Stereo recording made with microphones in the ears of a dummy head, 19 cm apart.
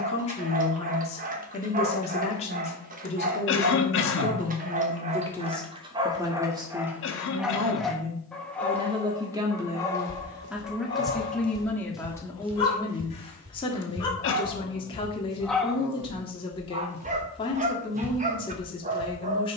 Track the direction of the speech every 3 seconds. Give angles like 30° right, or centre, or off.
30° left, 20° left, 20° right, 10° right, 20° left, 20° left, 20° left.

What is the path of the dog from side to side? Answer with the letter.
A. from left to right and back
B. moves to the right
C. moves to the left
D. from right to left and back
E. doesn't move
D.